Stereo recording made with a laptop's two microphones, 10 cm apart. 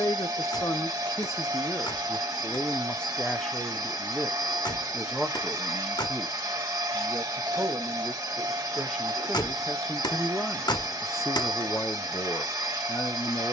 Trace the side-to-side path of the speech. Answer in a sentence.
In this clip you hear the speech move from left to right and back again.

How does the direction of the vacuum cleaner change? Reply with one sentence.
In this clip you hear the vacuum cleaner stay put.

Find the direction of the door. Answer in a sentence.
In this clip you hear the door on the left.